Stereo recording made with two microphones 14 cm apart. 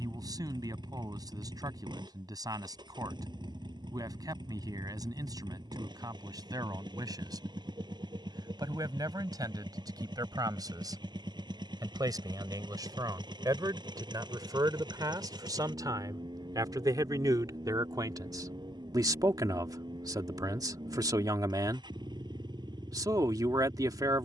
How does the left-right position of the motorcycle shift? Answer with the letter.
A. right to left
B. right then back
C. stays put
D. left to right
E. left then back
C.